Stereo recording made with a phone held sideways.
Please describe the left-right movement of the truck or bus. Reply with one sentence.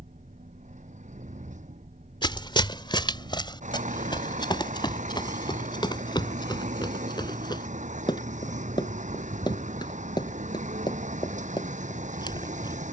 In this clip you hear the truck or bus stay in one place.